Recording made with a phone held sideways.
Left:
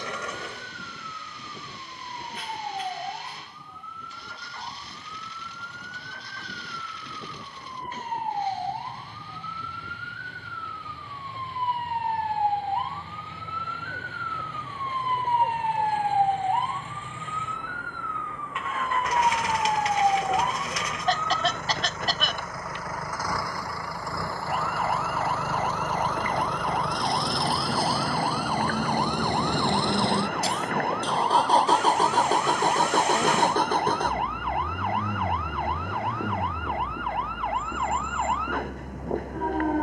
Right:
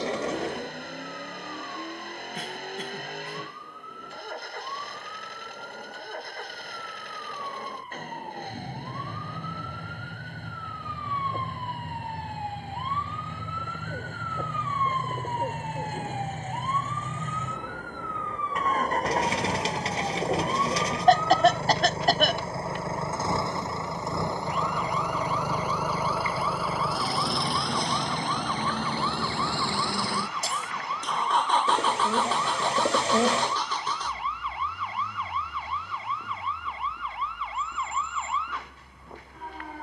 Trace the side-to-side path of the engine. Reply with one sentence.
In this clip you hear the engine travel towards the left.